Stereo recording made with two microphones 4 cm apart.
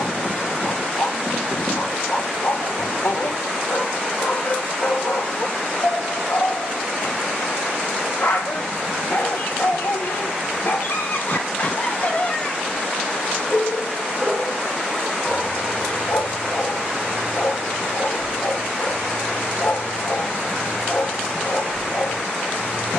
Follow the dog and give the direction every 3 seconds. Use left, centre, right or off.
left, left, left, left, centre, left, left, left.